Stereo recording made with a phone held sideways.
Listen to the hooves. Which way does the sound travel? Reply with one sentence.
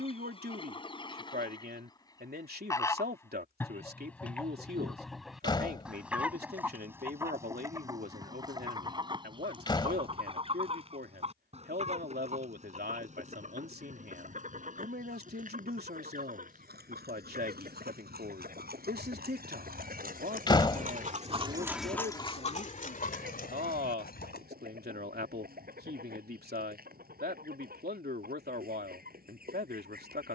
In this clip you hear the hooves travel towards the left.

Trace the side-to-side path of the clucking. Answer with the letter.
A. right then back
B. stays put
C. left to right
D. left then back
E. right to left
C.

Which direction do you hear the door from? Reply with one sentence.
In this clip you hear the door on the left.